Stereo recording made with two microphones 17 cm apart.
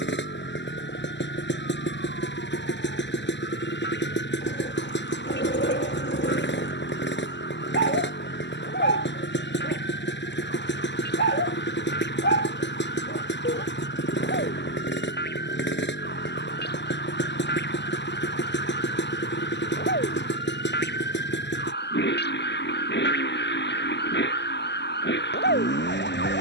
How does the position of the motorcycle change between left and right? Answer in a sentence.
In this clip you hear the motorcycle stay put.